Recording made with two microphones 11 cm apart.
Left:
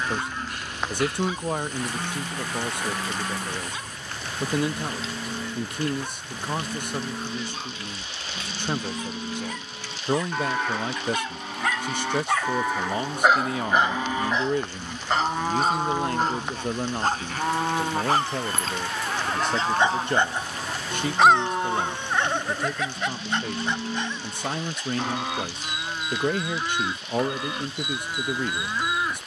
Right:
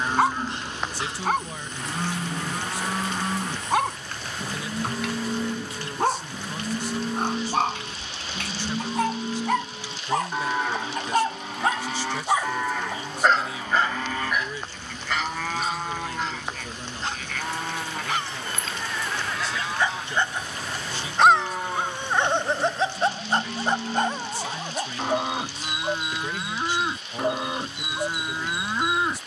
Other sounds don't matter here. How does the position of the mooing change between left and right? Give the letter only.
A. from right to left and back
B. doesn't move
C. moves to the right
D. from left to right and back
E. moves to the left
A.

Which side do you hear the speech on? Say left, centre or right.
left.